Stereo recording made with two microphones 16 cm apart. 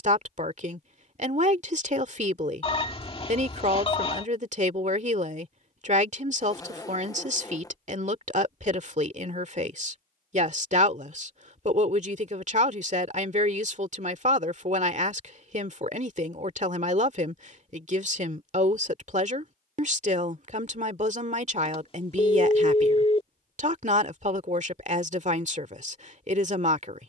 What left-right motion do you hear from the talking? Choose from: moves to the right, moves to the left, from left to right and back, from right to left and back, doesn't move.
doesn't move.